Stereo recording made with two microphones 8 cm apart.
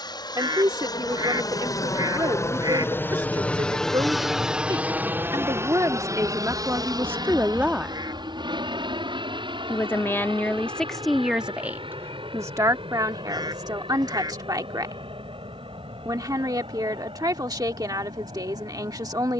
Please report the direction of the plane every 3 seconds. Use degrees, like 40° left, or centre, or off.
50° left, 10° right, 50° right, 60° right, 70° right, 70° right, 70° right.